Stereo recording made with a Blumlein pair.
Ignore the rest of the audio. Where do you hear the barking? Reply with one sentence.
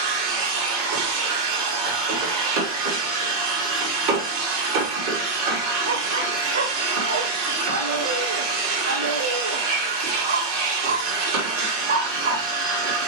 You can hear the barking on the right.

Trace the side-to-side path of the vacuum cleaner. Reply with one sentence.
You can hear the vacuum cleaner stay put.